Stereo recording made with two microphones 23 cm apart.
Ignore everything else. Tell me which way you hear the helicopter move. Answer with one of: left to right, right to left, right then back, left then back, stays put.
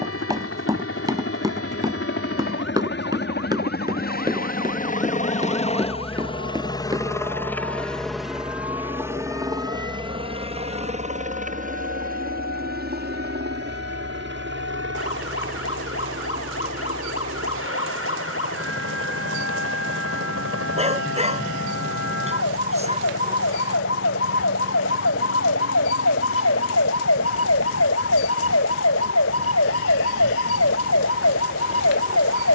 left to right.